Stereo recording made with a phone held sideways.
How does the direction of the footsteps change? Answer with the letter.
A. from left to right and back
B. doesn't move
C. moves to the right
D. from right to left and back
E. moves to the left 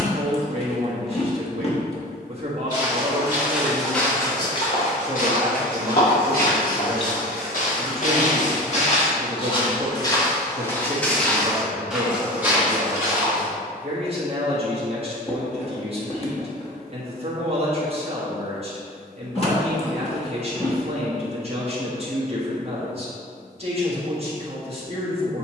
D.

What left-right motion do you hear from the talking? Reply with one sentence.
You can hear the talking stay in one place.